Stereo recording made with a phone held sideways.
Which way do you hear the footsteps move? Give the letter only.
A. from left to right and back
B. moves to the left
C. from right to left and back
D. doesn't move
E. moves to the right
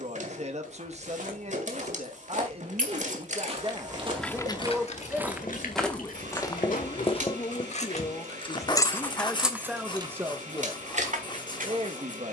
B.